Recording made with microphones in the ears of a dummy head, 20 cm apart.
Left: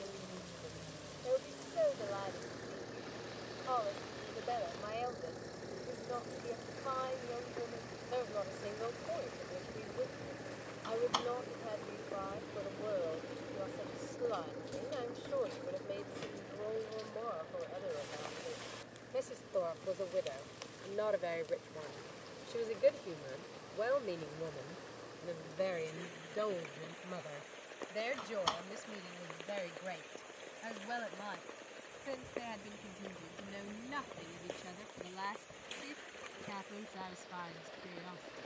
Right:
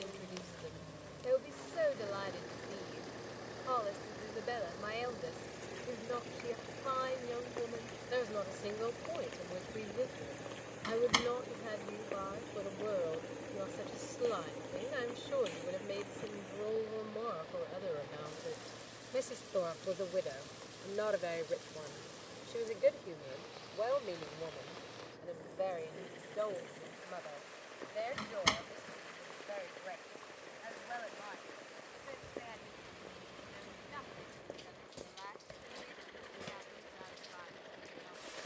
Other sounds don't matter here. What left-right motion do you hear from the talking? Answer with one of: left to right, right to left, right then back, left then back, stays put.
right to left.